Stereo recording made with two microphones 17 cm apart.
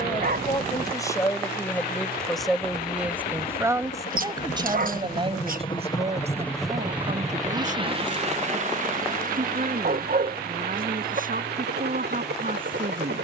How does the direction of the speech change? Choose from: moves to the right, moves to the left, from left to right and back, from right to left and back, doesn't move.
moves to the right.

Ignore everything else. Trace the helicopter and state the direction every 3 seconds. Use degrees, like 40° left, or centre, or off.
70° left, 50° left, 20° right, 60° right, 70° right.